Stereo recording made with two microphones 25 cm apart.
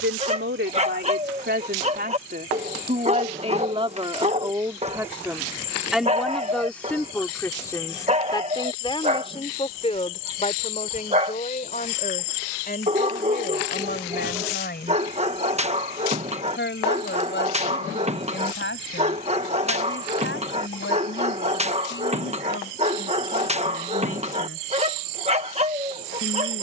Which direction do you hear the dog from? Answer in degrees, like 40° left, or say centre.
30° right.